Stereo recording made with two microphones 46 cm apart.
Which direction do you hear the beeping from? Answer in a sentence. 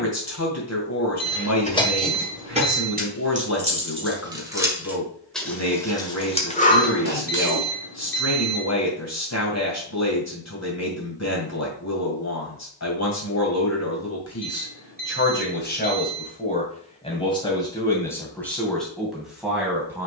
You can hear the beeping on the right.